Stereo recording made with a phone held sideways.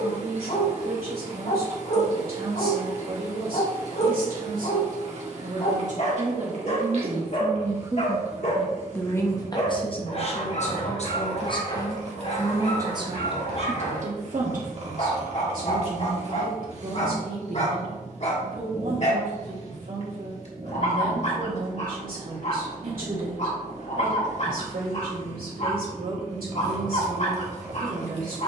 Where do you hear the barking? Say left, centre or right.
left.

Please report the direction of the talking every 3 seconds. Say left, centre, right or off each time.
right, right, right, left, right, right, right, right, right, right.